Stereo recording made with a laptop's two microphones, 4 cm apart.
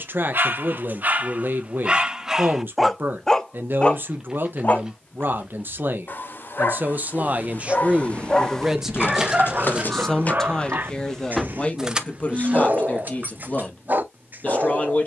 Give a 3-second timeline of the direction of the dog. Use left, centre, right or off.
right, left, left, right, right.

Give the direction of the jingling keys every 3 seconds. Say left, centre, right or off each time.
off, off, left, left, right.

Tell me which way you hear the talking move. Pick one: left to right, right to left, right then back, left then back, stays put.
right to left.